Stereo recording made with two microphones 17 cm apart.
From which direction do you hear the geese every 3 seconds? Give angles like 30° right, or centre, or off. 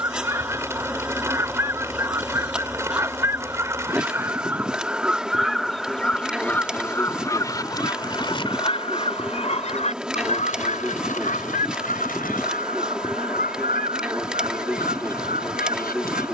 20° right, 10° right, 20° left, 50° left, 60° left, 60° left.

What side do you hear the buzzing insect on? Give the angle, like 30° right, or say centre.
centre.